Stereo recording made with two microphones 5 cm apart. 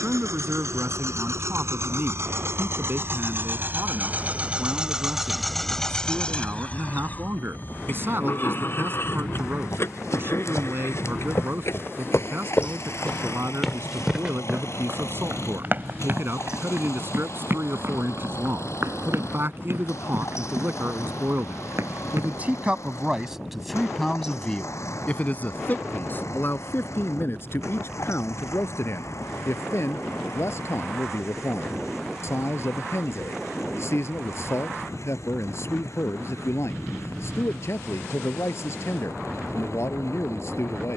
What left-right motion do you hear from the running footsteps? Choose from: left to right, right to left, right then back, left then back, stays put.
left to right.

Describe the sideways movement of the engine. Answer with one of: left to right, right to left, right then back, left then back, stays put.
right to left.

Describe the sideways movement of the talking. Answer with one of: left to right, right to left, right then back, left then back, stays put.
right to left.